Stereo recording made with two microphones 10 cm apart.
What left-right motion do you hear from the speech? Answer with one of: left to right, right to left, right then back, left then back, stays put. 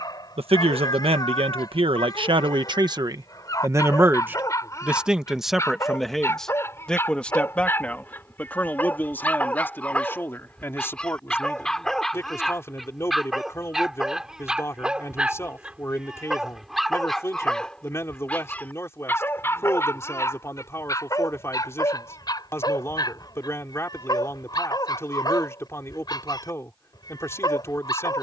right to left.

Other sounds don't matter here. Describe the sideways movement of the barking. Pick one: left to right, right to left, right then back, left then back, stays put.
right then back.